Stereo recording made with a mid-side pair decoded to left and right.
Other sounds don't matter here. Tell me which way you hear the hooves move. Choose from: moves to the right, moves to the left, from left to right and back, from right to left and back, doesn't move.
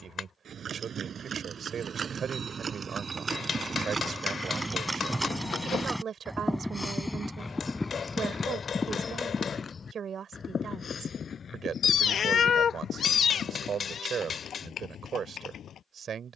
moves to the left.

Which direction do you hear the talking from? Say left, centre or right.
right.